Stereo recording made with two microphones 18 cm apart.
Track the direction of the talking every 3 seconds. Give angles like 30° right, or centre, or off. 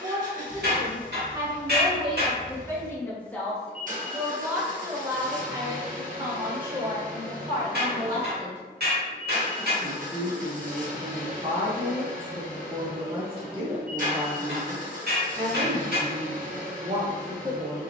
10° right, 10° right, 30° right, 30° right, 30° right, 30° right.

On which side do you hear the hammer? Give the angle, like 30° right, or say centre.
70° right.